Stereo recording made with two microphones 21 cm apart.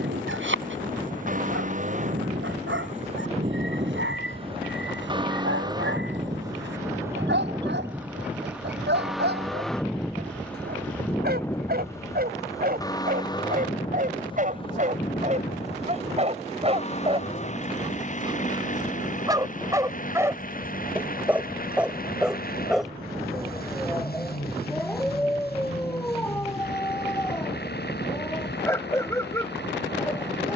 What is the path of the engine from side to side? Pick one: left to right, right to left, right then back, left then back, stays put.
right to left.